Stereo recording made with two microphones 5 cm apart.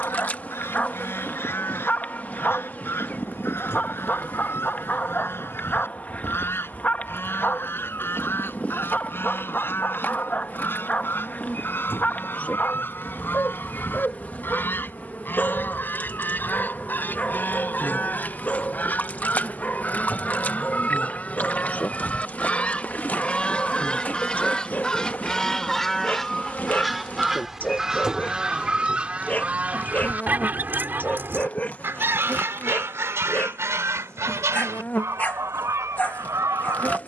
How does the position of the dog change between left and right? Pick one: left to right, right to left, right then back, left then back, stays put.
stays put.